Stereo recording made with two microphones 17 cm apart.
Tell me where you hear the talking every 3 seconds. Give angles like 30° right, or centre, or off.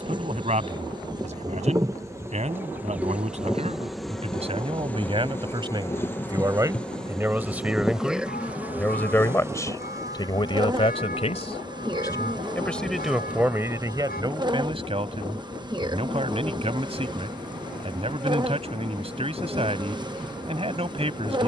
40° right, 40° right, 10° right, 30° left, 10° right, 40° right, 40° right.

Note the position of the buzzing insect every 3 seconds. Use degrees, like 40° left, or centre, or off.
20° right, centre, centre, 20° right, 30° right, 30° right, 30° right.